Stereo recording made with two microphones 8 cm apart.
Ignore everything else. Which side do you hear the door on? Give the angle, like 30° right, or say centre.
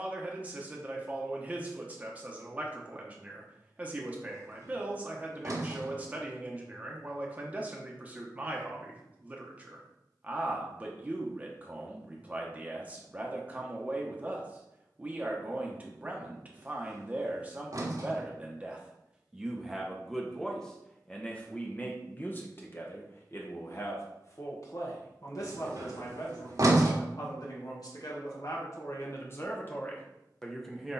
50° right.